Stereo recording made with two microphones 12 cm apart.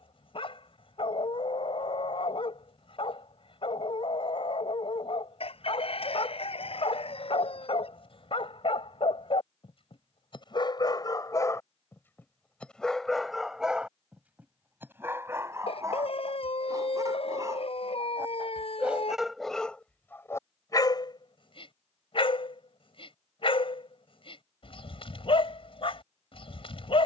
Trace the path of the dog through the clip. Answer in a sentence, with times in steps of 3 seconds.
In this clip you hear the dog on the left from 0 s, in the centre from 12 s, on the right from 15 s, in the centre from 18 s and on the left from 21 s.